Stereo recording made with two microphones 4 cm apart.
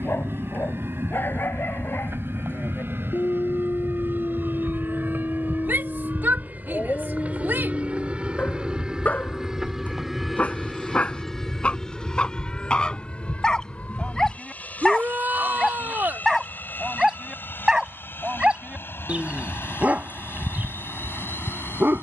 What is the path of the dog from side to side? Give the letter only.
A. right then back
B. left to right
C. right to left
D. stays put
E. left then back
B.